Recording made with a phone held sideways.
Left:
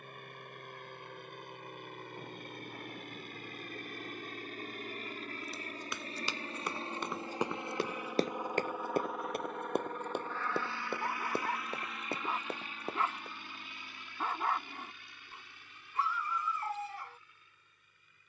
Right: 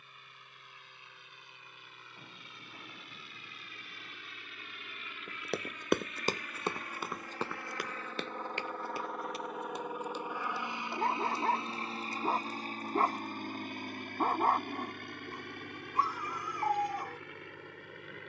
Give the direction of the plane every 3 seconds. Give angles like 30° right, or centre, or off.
60° left, 50° left, 20° left, 10° right, 40° right, 60° right.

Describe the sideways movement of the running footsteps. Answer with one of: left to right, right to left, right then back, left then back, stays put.
right to left.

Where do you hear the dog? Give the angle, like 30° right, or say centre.
40° right.